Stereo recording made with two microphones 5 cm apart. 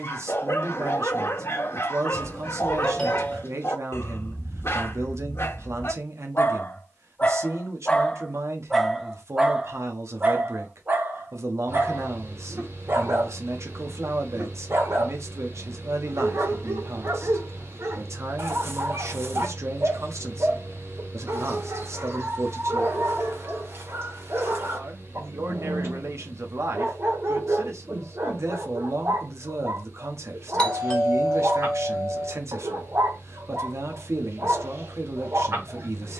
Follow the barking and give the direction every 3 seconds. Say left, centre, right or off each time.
left, left, left, right, right, right, right, right, right, right, right, right.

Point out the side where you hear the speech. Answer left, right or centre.
right.